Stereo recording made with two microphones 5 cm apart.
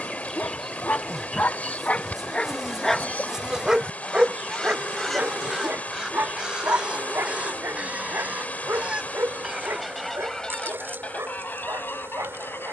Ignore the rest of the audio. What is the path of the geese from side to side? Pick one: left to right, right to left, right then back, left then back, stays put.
right then back.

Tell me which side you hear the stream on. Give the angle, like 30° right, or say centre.
30° left.